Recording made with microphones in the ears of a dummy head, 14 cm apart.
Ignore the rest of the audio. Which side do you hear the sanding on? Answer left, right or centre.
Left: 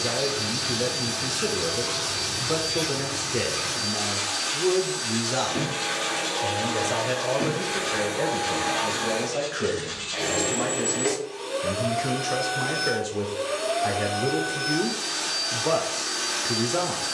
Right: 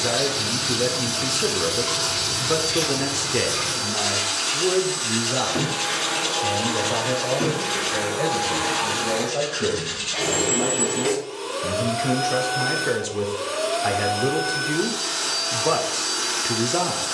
right.